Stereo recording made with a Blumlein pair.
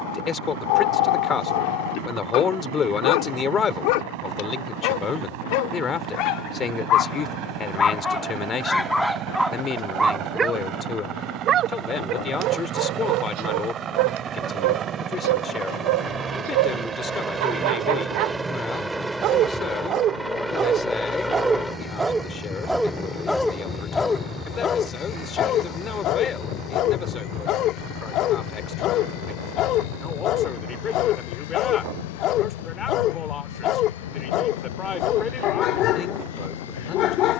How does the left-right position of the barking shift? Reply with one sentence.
You can hear the barking move from left to right and back again.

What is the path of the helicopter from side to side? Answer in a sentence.
In this clip you hear the helicopter move from right to left.